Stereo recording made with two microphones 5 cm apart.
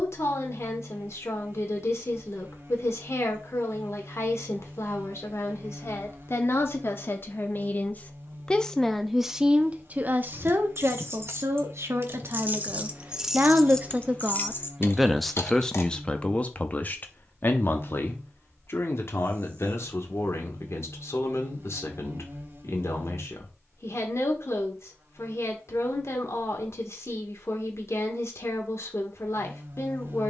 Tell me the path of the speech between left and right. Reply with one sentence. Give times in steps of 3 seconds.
In this clip you hear the speech on the left from 0 s, on the right from 9 s and on the left from 15 s.